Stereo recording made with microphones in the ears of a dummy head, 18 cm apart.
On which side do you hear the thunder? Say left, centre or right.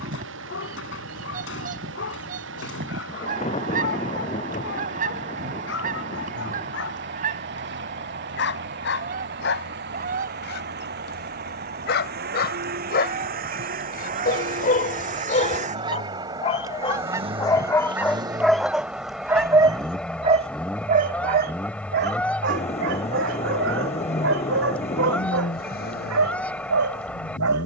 left.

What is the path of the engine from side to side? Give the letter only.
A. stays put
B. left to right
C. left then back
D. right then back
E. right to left
E.